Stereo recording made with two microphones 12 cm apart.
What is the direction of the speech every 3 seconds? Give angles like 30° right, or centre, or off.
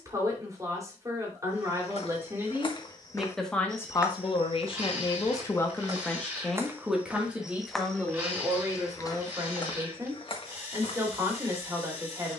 20° right, 30° left, 10° right, 30° right.